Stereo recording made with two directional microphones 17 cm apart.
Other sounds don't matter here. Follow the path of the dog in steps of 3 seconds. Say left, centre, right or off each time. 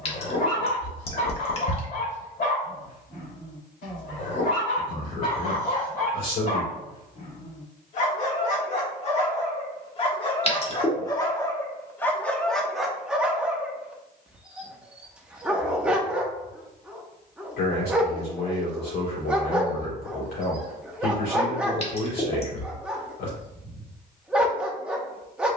left, left, left, left, centre, centre, centre, centre, centre.